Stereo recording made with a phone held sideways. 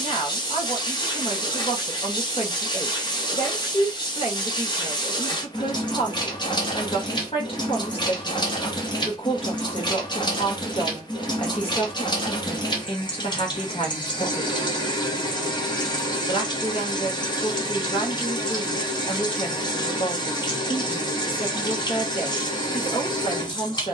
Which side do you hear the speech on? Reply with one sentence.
You can hear the speech on the left.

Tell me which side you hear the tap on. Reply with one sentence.
You can hear the tap on the left.